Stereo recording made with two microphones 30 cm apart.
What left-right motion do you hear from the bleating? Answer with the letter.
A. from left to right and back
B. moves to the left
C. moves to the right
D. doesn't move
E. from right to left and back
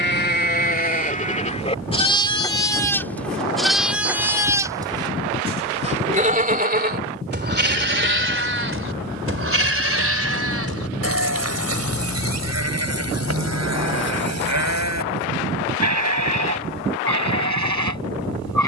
C.